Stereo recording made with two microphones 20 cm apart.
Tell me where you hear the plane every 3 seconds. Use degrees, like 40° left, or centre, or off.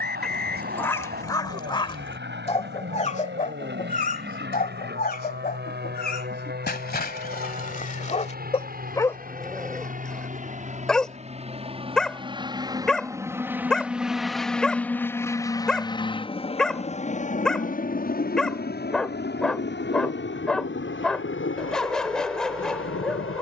70° right, 60° right, 50° right, 40° right, 10° right, 30° left, 50° left, 60° left.